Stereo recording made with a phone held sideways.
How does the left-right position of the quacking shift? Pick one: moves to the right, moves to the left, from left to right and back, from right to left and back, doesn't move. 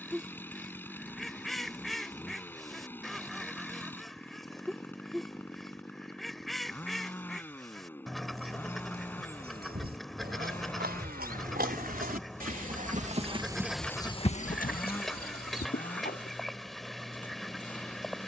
doesn't move.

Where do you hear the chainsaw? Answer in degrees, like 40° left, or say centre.
10° left.